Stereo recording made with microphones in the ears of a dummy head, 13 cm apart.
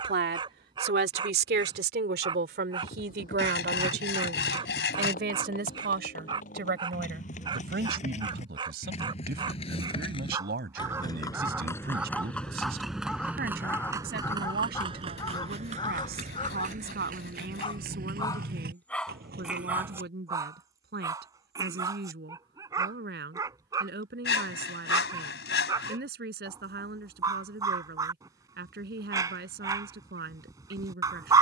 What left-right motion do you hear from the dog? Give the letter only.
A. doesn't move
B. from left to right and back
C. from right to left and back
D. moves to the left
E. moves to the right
C.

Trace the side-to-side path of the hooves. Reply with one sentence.
In this clip you hear the hooves go from the left side to the right.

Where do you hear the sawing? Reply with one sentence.
You can hear the sawing on the left.